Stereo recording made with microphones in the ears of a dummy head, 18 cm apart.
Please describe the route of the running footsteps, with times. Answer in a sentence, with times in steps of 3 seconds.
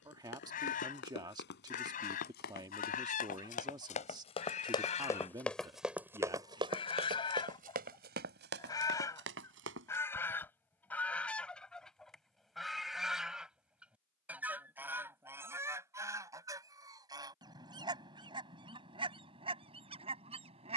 In this clip you hear the running footsteps on the left from 0 s, on the right from 6 s and not at all from 12 s.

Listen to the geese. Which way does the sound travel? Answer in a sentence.
You can hear the geese move from left to right.